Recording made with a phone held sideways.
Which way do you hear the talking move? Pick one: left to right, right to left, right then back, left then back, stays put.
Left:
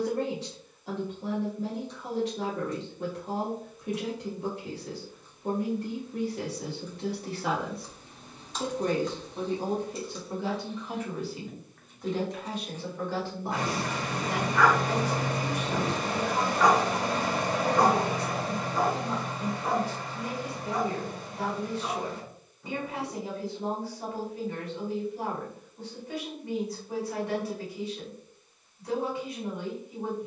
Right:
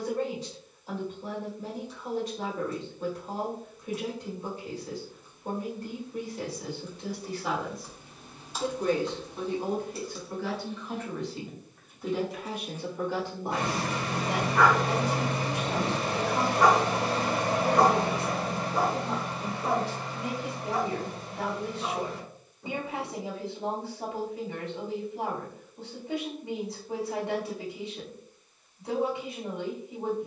left to right.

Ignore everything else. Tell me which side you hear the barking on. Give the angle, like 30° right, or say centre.
30° right.